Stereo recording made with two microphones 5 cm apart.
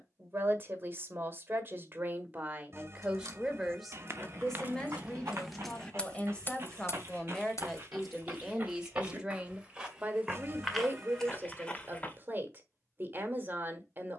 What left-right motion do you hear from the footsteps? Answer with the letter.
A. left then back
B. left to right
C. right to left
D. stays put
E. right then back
C.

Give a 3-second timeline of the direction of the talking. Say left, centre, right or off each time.
right, centre, centre, right, right.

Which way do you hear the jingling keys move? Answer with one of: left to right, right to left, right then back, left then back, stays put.
right to left.